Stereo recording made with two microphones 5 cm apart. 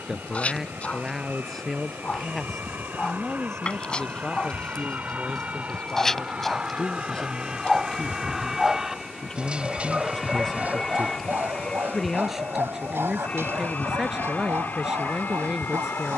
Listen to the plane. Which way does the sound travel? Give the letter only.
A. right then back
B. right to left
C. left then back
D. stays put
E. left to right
B.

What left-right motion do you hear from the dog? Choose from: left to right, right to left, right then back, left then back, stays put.
left to right.